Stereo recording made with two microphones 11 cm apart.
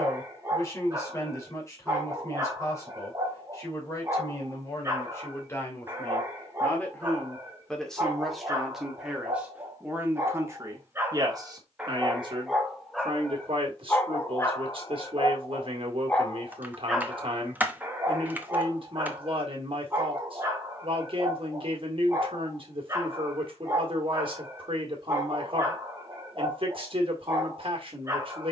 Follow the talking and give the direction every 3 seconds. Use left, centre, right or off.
left, left, centre, right, right, right, right, right, right, right.